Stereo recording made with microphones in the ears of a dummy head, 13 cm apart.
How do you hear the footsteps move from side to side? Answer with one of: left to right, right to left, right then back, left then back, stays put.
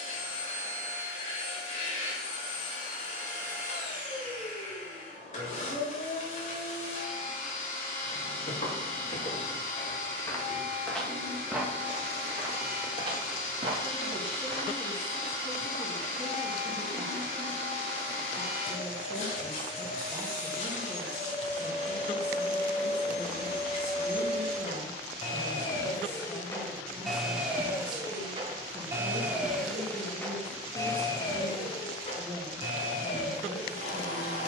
left to right.